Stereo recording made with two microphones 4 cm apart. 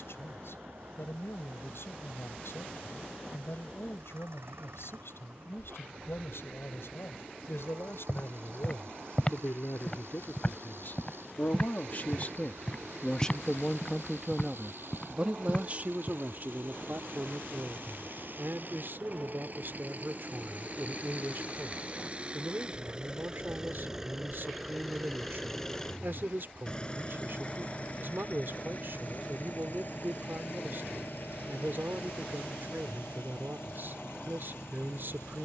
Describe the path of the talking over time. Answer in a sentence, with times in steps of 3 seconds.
In this clip you hear the talking on the left from 0 s, in the centre from 12 s and on the right from 15 s.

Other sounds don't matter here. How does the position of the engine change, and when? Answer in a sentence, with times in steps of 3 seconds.
In this clip you hear the engine on the right from 0 s, in the centre from 24 s and on the left from 27 s.